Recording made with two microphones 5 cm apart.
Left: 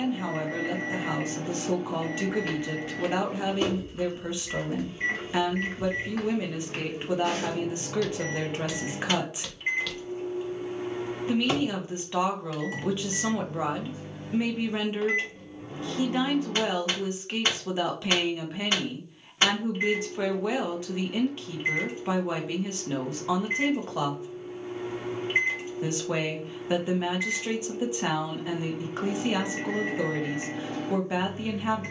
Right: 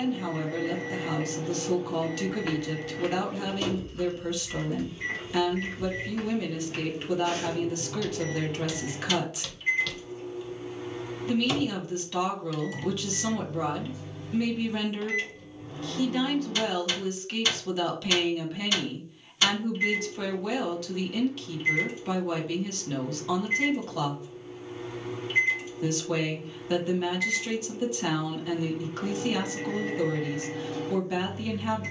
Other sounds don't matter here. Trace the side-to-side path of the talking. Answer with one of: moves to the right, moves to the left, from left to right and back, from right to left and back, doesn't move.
doesn't move.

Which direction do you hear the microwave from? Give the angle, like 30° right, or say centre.
30° left.